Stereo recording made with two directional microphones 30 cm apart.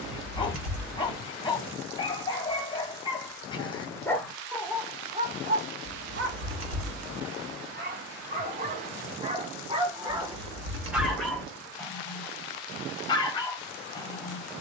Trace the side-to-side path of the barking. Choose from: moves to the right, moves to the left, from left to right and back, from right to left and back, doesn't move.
from left to right and back.